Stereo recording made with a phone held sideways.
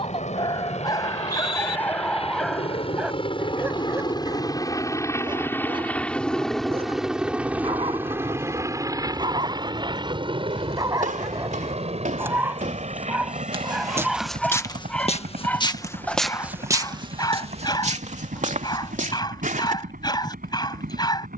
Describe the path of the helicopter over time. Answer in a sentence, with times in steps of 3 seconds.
In this clip you hear the helicopter on the left from 0 s, in the centre from 6 s and on the right from 9 s.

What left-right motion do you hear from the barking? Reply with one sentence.
You can hear the barking move from left to right and back again.